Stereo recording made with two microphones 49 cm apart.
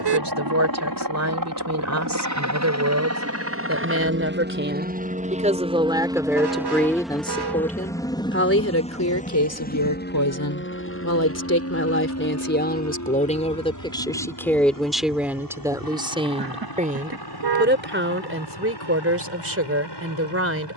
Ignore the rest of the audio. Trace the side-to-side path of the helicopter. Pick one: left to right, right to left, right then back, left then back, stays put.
right to left.